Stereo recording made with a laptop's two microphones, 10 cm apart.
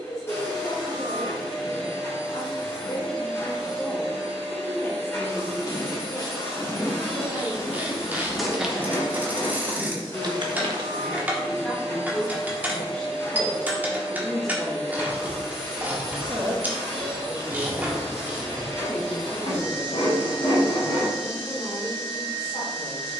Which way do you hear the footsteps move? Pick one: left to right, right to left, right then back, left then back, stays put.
left to right.